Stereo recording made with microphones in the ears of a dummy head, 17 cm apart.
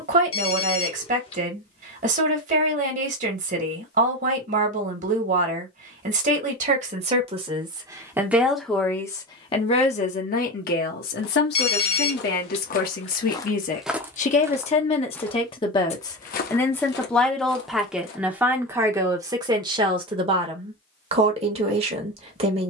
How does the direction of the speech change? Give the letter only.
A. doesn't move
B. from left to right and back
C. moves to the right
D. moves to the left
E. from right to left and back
E.